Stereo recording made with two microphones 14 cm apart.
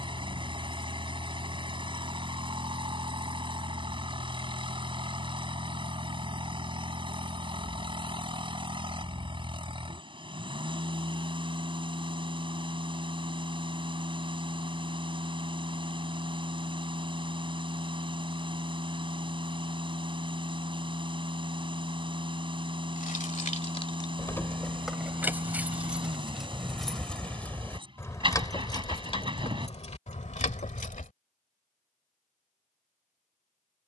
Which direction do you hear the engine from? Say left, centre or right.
right.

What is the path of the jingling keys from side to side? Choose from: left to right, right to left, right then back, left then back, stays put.
right then back.